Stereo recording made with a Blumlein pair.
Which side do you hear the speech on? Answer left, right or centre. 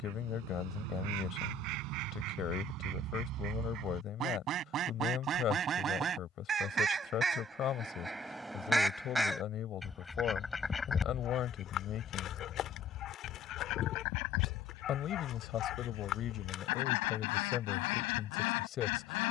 left.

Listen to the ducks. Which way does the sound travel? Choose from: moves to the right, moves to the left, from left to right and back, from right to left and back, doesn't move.
moves to the left.